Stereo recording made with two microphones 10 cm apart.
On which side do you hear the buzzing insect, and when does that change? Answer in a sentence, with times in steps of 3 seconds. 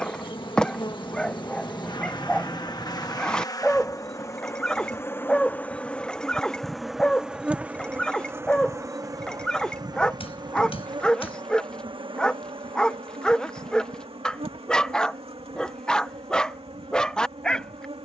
You can hear the buzzing insect on the left from 0 s, in the centre from 6 s and on the right from 9 s.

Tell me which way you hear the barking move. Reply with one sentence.
You can hear the barking stay put.